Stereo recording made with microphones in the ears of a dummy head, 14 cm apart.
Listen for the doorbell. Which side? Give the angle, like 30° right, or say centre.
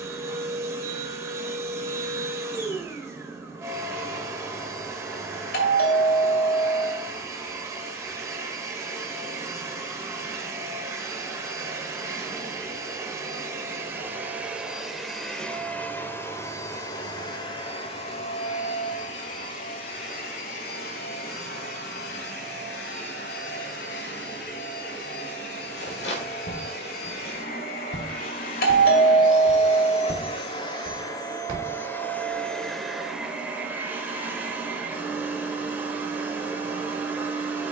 70° left.